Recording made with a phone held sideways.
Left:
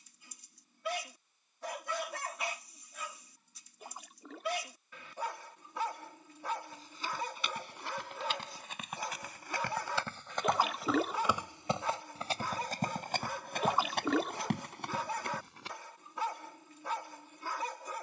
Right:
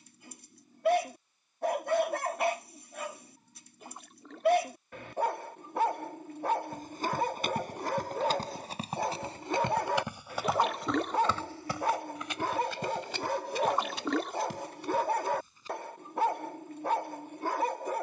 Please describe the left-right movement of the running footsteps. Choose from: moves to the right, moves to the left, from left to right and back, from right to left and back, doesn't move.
moves to the left.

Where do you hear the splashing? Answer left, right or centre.
centre.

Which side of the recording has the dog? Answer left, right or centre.
right.